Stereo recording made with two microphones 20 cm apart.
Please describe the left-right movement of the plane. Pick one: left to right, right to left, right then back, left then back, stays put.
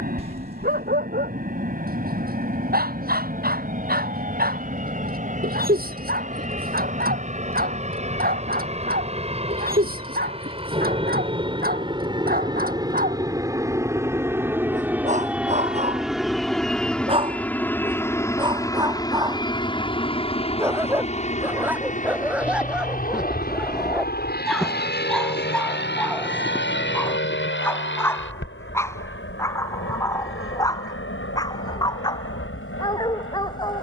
right to left.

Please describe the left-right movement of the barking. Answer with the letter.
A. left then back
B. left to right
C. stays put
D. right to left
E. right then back
D.